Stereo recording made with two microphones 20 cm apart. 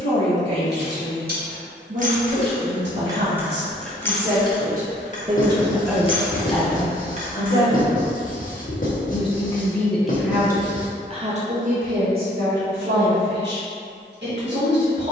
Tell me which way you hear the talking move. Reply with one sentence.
You can hear the talking go left and come back.